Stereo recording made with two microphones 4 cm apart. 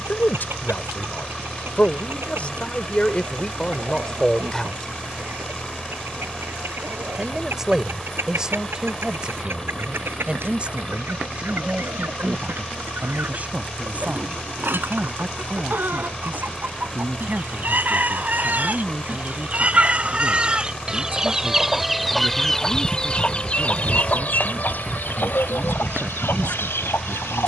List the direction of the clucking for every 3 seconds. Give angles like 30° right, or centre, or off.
70° right, 60° right, 60° right, 60° right, 60° right, 50° right, 30° right, 10° left, 60° left.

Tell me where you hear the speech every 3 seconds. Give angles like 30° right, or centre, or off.
40° left, 20° left, 10° right, 20° right, 30° right, 40° right, 50° right, 50° right, 50° right.